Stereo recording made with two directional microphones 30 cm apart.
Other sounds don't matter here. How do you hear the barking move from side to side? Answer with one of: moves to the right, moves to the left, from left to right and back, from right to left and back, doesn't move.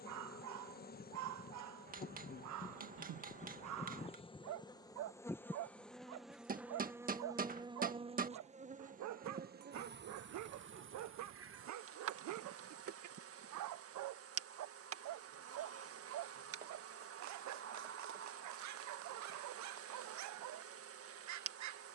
doesn't move.